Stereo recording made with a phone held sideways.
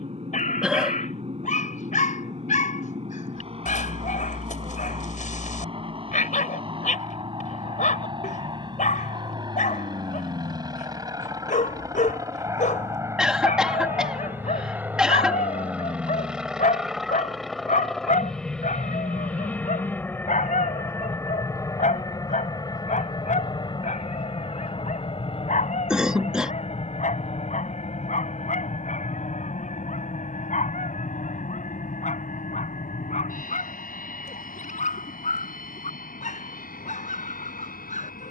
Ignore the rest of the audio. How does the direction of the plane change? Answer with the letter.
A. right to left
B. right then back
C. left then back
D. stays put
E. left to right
A.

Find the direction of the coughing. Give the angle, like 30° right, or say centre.
10° right.